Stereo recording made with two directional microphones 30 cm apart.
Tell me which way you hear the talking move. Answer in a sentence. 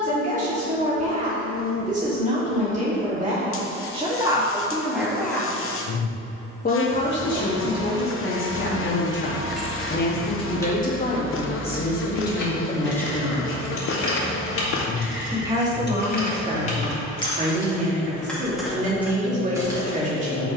In this clip you hear the talking move from right to left and back again.